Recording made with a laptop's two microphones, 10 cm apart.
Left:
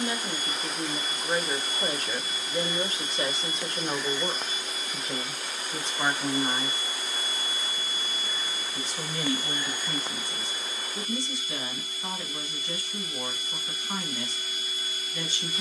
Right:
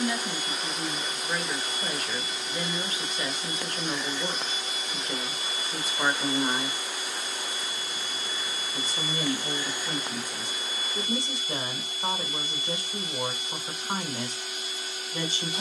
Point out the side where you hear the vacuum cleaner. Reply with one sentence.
You can hear the vacuum cleaner on the right.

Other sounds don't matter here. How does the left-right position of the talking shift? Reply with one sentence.
You can hear the talking travel towards the right.